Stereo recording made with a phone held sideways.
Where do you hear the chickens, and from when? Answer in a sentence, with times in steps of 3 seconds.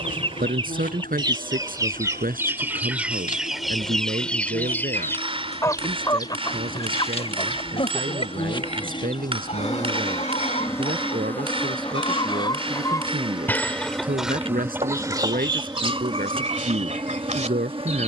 In this clip you hear the chickens on the right from 0 s, in the centre from 3 s, on the left from 6 s, in the centre from 12 s and on the right from 15 s.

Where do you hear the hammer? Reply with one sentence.
In this clip you hear the hammer on the right.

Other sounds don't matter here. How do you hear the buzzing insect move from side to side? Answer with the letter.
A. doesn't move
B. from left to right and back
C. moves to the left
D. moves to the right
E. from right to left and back
D.